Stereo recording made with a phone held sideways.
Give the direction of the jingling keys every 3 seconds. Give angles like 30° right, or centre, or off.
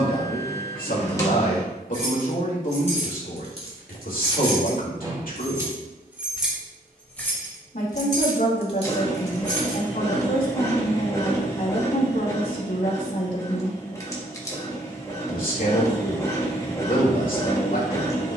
50° right, 30° right, 10° left, 50° left, off, off.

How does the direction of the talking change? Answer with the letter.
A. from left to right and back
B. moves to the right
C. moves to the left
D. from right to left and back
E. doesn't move
E.